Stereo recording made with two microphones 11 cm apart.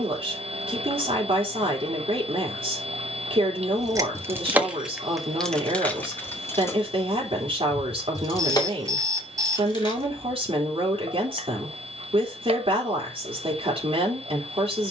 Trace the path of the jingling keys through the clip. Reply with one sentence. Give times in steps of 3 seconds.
You can hear the jingling keys not at all from 0 s, in the centre from 3 s, on the left from 6 s and not at all from 12 s.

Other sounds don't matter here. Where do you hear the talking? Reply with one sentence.
You can hear the talking on the right.